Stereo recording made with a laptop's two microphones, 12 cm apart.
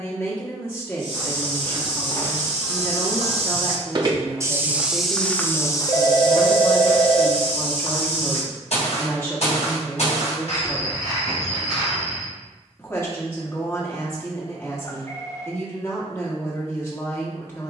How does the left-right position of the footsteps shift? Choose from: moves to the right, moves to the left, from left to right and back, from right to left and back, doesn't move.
moves to the left.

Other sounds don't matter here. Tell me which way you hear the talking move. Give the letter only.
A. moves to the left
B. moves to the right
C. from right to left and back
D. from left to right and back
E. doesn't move
E.